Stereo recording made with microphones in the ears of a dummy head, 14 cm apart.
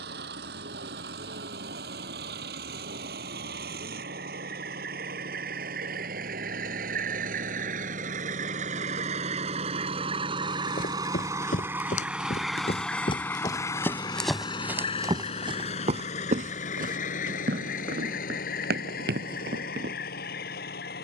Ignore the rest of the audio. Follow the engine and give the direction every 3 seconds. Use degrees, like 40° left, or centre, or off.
70° right, 70° right, 60° right, 30° right, 20° left, 50° left, 60° left.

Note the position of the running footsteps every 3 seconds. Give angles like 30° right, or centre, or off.
off, off, off, 60° left, 20° left, 50° right, 70° right.